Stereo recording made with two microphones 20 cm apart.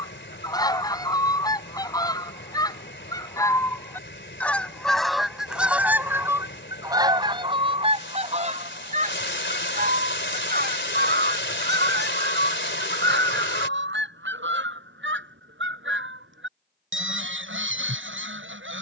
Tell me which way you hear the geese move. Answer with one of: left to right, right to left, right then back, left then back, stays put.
left to right.